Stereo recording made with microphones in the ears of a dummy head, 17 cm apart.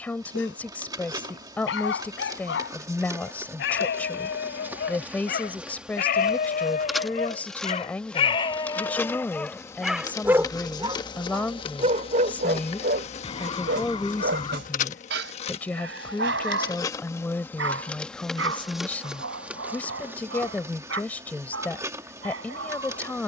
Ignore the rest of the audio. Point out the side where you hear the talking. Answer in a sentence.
In this clip you hear the talking in the centre.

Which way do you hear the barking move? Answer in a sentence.
In this clip you hear the barking move to the right.